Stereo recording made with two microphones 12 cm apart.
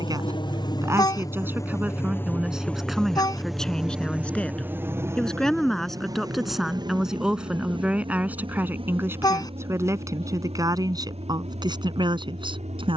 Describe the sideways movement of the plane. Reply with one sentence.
You can hear the plane move to the right.